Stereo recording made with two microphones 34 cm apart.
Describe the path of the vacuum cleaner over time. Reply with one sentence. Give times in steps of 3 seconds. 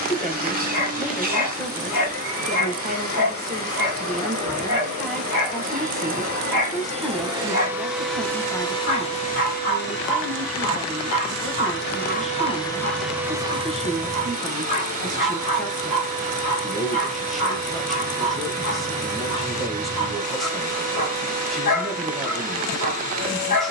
In this clip you hear the vacuum cleaner on the right from 0 s, in the centre from 6 s, on the left from 9 s, in the centre from 12 s and on the right from 15 s.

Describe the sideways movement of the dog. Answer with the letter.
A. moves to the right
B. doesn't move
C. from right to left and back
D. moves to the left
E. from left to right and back
B.